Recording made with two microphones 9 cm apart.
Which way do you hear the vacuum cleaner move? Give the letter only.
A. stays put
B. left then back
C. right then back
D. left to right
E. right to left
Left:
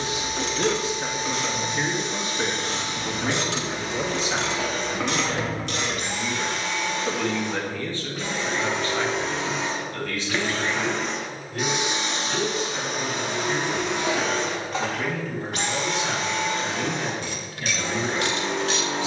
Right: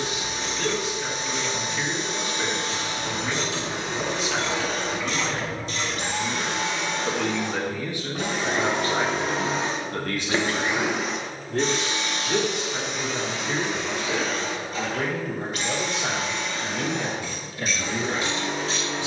E.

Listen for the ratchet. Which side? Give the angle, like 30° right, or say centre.
60° left.